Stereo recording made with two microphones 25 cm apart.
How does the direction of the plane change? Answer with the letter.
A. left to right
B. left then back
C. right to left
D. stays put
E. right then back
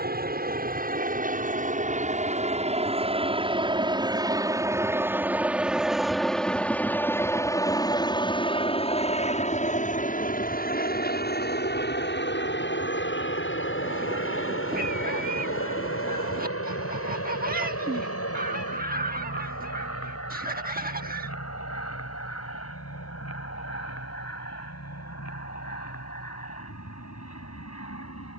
C.